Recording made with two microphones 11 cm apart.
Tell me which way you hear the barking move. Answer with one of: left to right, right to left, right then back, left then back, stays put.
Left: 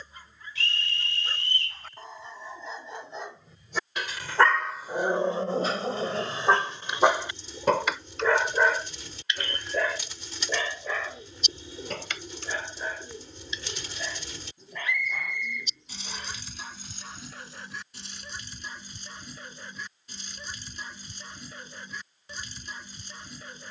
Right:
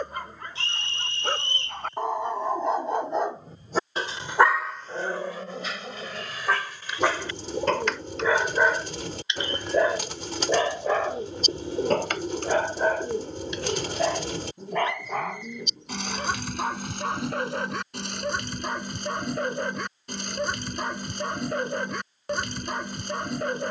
left then back.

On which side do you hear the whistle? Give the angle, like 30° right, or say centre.
30° right.